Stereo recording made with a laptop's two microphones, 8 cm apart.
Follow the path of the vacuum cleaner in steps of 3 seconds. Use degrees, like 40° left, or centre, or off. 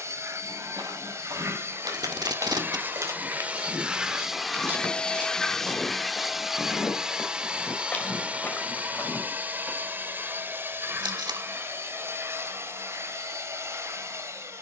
30° right, centre, 10° right, 20° right, 30° right.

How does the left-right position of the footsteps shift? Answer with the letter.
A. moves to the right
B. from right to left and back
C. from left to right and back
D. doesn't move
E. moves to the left
E.